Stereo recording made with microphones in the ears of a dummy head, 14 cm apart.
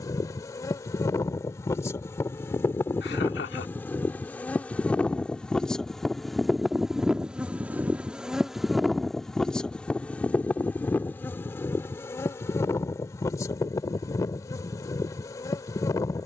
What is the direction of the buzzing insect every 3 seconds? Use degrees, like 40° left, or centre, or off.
20° left, 10° left, centre, 10° left, 20° left, 20° left.